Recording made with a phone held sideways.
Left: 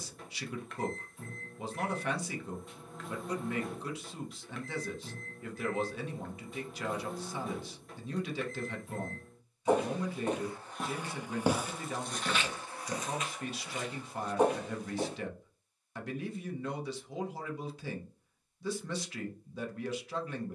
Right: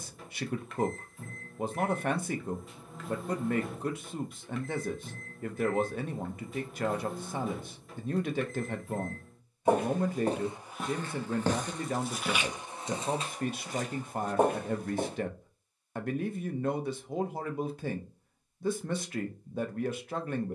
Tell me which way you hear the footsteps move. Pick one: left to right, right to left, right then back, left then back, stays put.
left then back.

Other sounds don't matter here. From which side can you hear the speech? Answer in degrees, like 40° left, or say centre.
60° right.